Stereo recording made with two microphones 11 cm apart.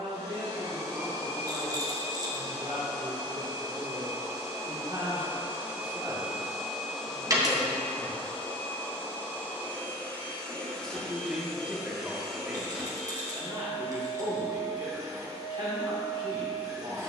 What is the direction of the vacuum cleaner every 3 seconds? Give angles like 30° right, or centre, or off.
40° right, 30° right, 10° left, 10° left, 20° right, 30° right.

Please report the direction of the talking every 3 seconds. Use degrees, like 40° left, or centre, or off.
50° right, 40° right, 10° right, centre, 30° right, 50° right.